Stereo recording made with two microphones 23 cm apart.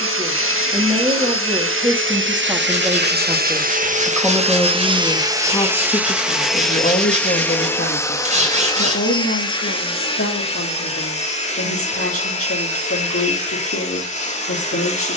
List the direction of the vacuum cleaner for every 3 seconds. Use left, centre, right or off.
right, right, centre, left, left.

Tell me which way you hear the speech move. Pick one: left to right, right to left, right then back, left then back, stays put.
right to left.